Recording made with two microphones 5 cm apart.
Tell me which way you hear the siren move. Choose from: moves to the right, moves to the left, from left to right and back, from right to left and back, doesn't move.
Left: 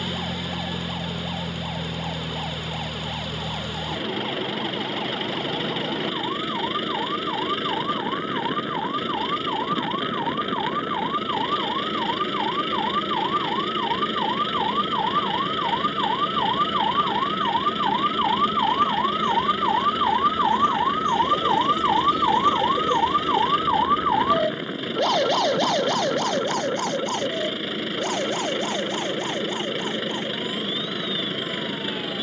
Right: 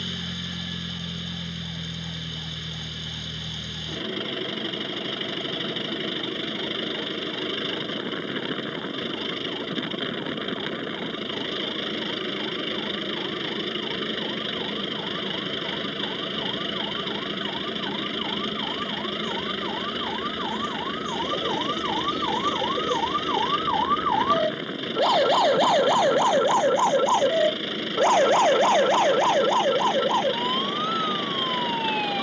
moves to the right.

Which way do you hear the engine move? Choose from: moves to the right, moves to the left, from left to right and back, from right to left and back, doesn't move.
doesn't move.